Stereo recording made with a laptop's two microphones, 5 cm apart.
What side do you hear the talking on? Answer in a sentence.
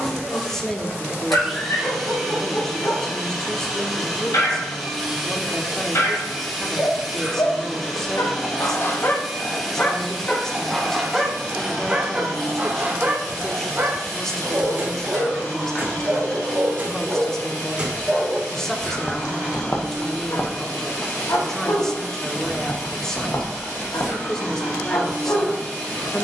You can hear the talking in the centre.